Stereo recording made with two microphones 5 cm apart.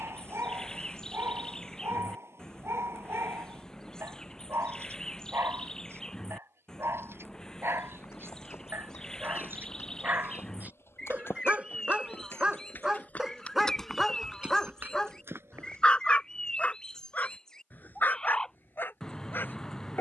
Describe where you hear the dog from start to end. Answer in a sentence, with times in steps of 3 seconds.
In this clip you hear the dog on the right from 0 s, in the centre from 12 s and on the left from 15 s.